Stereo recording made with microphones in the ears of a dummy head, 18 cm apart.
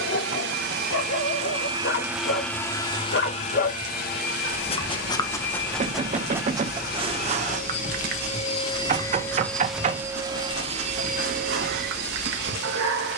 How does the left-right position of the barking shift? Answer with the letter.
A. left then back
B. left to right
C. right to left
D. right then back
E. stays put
B.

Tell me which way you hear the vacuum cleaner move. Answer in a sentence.
You can hear the vacuum cleaner move from right to left and back again.